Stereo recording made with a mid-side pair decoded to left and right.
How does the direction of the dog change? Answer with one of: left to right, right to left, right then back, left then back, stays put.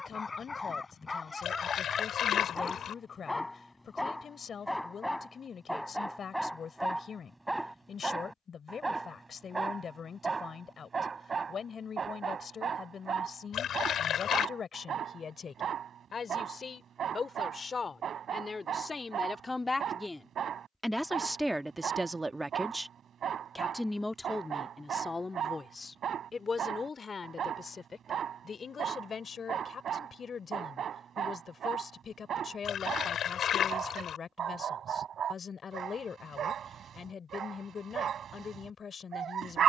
left to right.